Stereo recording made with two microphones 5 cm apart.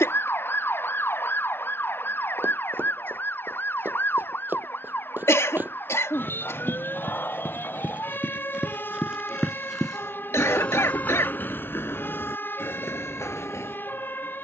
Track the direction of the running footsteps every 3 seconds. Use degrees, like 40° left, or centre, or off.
50° right, 50° right, 30° right, 20° left, 70° left.